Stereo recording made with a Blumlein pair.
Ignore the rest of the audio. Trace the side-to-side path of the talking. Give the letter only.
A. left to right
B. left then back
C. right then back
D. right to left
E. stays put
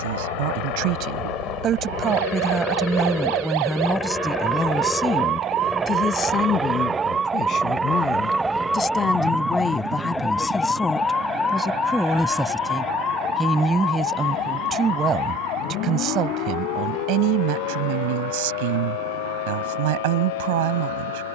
B.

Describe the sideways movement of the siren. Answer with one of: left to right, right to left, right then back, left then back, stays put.
right to left.